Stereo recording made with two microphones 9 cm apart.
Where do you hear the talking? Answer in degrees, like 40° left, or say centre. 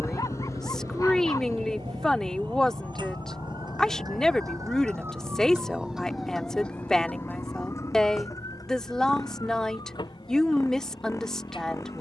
10° left.